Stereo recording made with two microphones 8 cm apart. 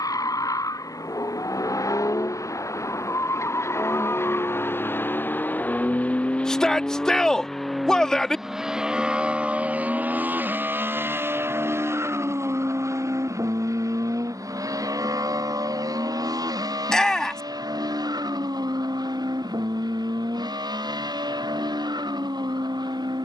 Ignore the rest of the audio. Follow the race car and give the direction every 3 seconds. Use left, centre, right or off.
left, left, centre, right, right, right, right, right.